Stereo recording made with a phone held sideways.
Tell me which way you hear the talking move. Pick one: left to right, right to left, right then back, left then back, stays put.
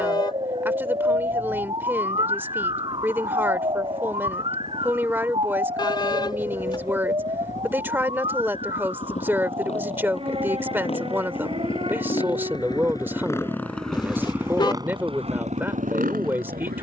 stays put.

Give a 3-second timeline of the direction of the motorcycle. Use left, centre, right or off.
left, left, left, left, centre, right.